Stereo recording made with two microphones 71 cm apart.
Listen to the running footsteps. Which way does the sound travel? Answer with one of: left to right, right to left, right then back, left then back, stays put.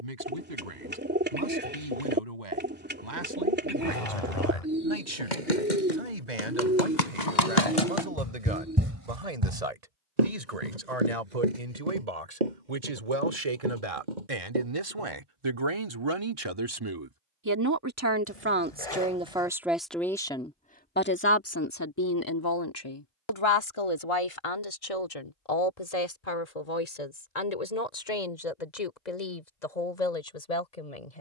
left to right.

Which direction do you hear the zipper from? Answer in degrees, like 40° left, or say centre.
50° left.